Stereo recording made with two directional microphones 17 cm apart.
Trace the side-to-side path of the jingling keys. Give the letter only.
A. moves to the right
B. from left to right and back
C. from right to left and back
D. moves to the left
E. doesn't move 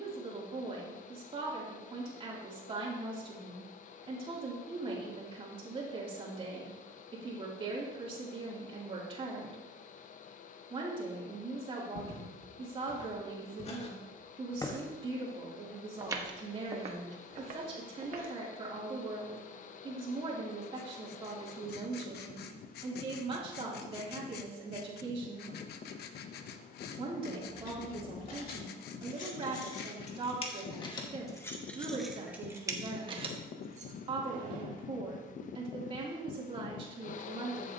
A.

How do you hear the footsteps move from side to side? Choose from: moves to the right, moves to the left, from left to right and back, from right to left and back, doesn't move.
moves to the right.